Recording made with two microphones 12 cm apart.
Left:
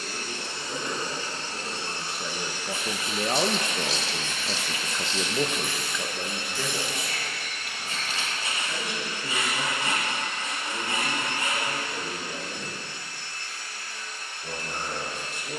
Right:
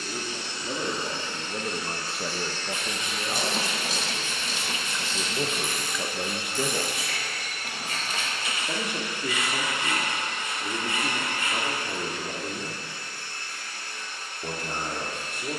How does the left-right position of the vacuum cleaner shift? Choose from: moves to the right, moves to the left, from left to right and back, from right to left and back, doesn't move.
moves to the right.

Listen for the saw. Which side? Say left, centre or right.
left.